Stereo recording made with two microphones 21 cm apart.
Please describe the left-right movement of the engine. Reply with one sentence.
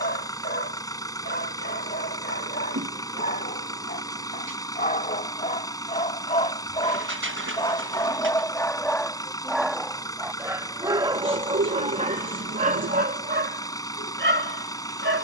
In this clip you hear the engine stay put.